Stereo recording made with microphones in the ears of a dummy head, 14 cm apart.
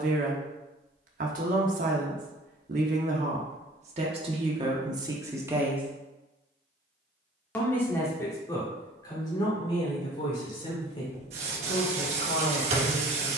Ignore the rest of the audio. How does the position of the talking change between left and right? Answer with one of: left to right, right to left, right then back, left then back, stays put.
right to left.